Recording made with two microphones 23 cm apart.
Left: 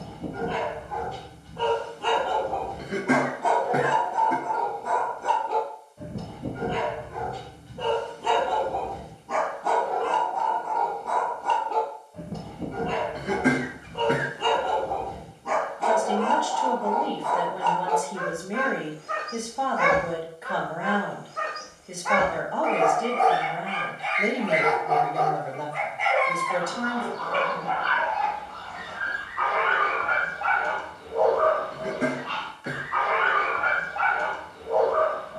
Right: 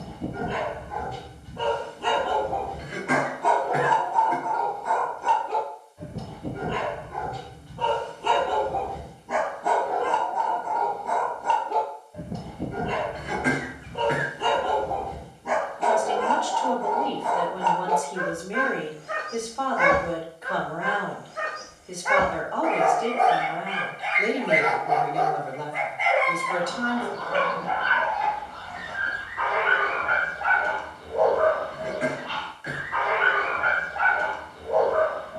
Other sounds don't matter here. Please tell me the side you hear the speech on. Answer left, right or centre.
centre.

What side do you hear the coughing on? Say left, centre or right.
left.